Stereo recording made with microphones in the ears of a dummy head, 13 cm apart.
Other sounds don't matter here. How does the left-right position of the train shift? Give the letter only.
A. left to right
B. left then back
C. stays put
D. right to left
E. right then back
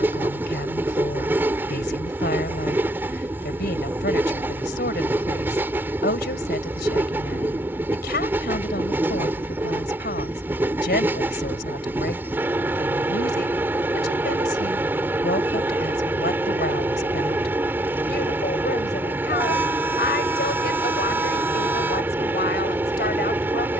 C.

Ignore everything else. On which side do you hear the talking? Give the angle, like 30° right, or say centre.
80° left.